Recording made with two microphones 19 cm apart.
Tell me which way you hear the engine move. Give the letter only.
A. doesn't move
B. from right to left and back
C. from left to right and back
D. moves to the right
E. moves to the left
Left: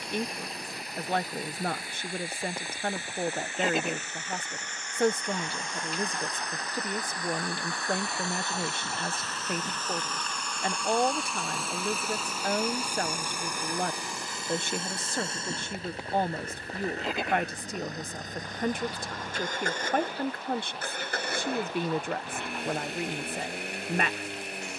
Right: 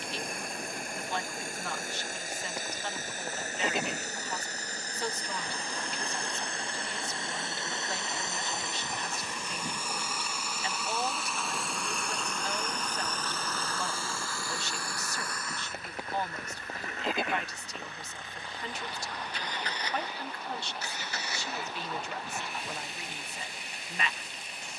E.